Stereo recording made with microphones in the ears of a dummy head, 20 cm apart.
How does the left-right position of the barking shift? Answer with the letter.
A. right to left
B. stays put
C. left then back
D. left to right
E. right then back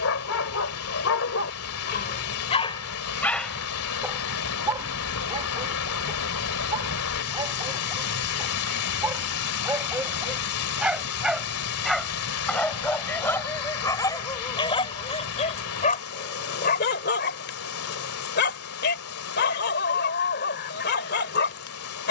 E.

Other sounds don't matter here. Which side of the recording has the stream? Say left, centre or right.
left.